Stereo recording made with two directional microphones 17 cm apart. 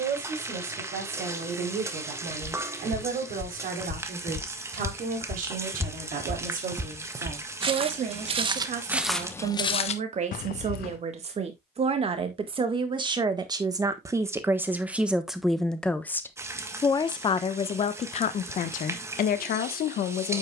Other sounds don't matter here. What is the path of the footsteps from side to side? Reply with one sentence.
In this clip you hear the footsteps go right and come back.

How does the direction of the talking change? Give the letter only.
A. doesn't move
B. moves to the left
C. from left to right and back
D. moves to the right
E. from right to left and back
B.